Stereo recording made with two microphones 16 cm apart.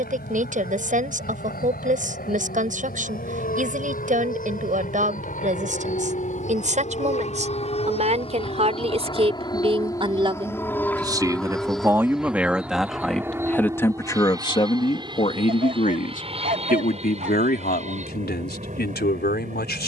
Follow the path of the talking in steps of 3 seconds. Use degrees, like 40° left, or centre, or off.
50° right, 50° right, 40° right, 30° right, 10° left, 60° left, 80° left.